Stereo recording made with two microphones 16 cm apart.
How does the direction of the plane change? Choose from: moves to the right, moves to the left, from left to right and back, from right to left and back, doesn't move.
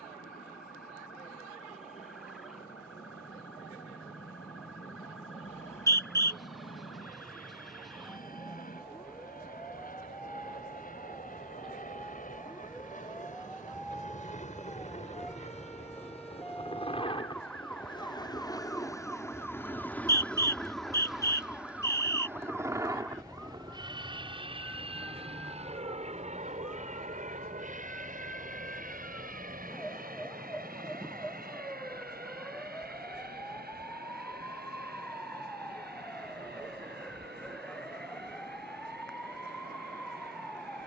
moves to the right.